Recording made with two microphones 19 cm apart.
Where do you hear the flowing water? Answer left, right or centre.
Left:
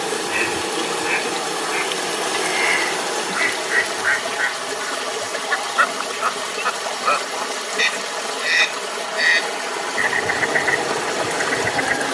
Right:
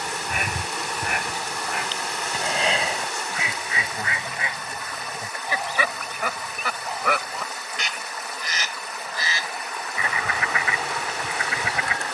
left.